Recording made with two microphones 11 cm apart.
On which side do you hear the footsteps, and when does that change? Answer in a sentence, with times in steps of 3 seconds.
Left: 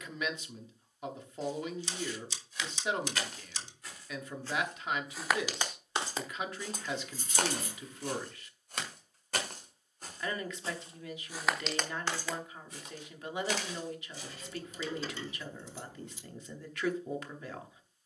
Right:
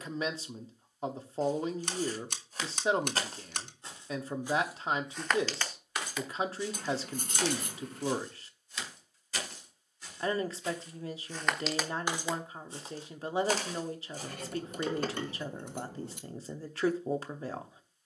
You can hear the footsteps on the right from 0 s, in the centre from 3 s, on the left from 6 s, on the right from 12 s and not at all from 15 s.